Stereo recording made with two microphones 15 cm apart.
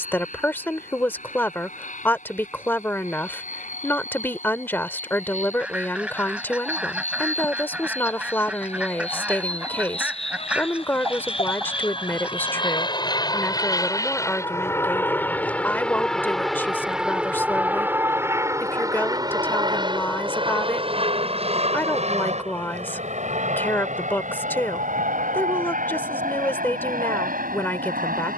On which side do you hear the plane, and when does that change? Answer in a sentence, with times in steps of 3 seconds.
In this clip you hear the plane on the left from 0 s, in the centre from 15 s and on the right from 18 s.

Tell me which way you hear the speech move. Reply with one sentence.
In this clip you hear the speech stay put.